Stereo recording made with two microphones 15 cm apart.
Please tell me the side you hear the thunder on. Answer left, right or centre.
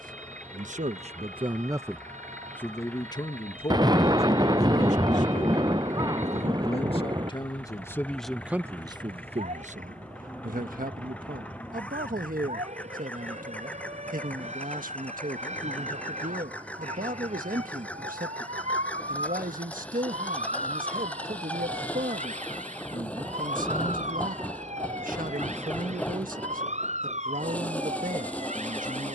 right.